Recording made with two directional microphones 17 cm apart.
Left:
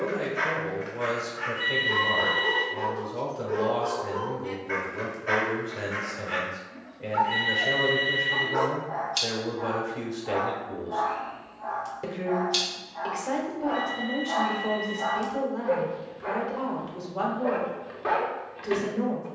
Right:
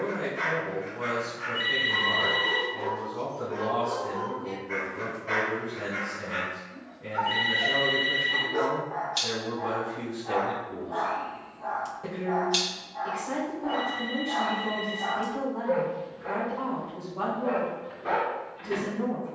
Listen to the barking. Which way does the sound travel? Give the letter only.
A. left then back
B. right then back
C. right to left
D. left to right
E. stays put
B.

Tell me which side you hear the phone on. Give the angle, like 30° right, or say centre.
30° right.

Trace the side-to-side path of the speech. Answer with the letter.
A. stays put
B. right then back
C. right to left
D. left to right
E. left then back
A.